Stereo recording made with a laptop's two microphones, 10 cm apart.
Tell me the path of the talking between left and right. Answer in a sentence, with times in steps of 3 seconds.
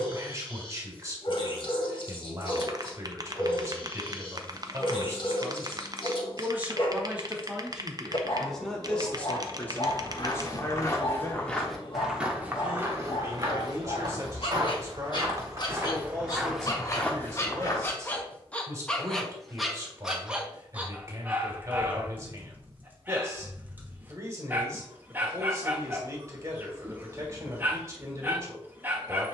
You can hear the talking on the right from 0 s, in the centre from 6 s, on the left from 9 s and on the right from 12 s.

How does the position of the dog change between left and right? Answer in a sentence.
You can hear the dog move from left to right.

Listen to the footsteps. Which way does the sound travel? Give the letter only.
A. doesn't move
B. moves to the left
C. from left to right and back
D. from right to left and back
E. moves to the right
C.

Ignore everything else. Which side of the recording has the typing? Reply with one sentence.
You can hear the typing on the right.